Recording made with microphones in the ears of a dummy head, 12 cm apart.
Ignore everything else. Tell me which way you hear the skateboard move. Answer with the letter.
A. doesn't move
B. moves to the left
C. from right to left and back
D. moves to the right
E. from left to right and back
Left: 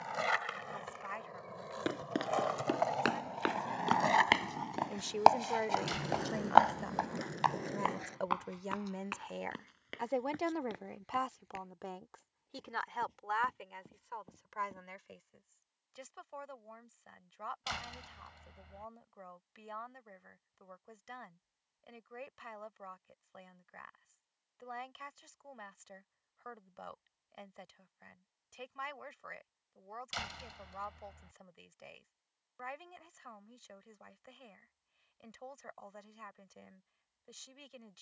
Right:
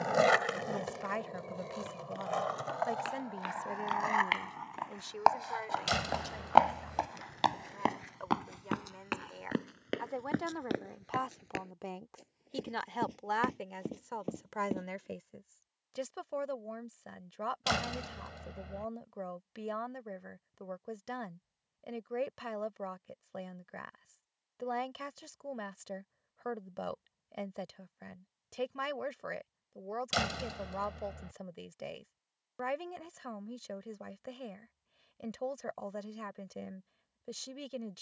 B.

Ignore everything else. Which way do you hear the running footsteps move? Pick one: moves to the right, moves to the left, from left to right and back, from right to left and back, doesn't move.
moves to the right.